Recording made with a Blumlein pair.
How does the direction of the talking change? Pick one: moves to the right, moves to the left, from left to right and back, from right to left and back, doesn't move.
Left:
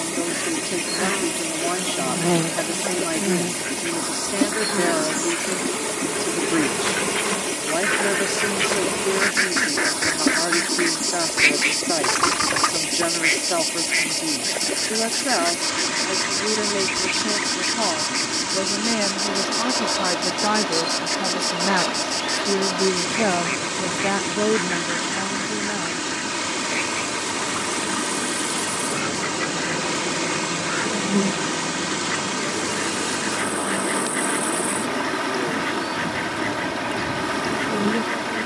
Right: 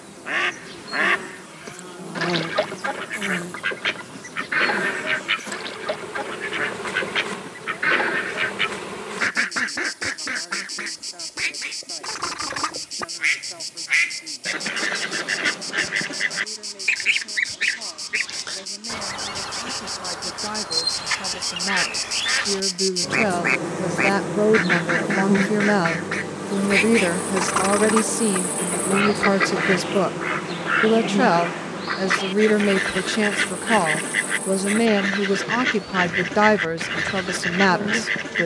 moves to the right.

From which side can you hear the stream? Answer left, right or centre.
left.